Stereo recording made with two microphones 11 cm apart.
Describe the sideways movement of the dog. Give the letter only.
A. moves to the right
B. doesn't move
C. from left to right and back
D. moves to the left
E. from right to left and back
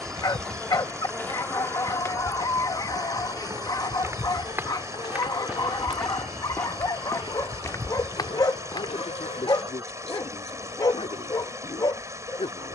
B.